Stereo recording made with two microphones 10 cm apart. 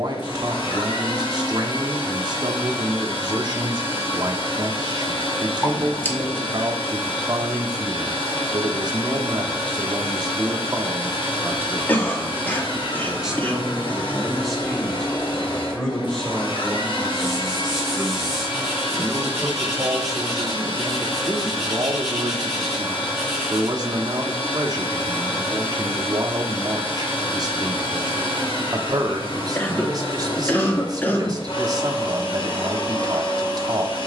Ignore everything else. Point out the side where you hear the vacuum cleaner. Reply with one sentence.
In this clip you hear the vacuum cleaner on the left.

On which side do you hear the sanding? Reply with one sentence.
You can hear the sanding in the centre.